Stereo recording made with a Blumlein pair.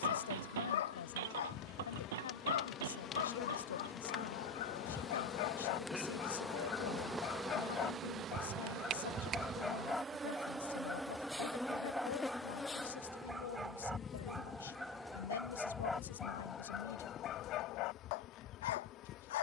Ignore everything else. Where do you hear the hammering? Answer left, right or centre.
right.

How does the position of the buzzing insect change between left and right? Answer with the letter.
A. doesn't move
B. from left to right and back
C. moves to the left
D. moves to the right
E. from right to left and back
B.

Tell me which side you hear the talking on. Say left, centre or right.
left.